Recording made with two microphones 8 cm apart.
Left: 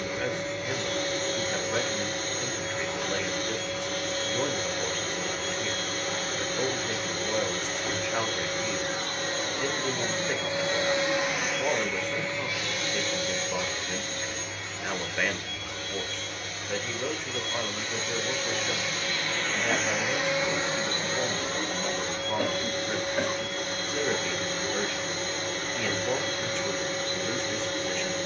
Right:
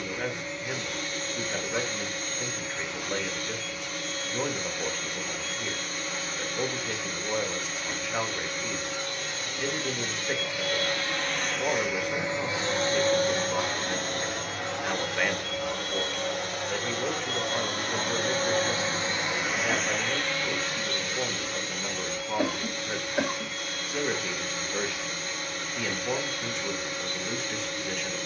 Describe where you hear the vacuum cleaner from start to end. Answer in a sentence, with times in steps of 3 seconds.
You can hear the vacuum cleaner on the left from 0 s, on the right from 12 s, in the centre from 18 s and on the left from 21 s.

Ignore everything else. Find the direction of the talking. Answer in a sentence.
In this clip you hear the talking in the centre.